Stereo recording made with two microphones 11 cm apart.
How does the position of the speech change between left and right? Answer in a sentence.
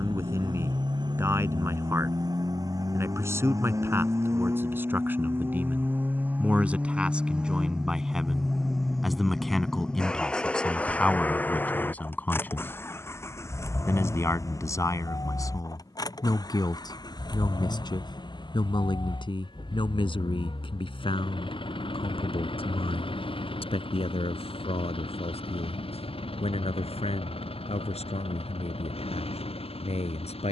In this clip you hear the speech move from right to left.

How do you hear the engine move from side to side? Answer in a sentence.
In this clip you hear the engine move from right to left.